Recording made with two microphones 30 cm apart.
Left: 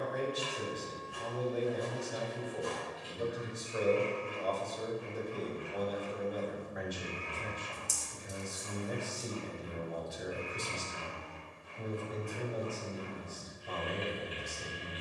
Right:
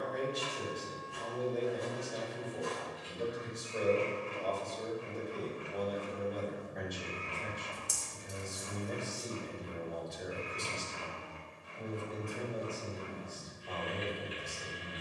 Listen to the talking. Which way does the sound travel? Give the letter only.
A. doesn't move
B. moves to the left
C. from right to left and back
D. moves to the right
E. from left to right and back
A.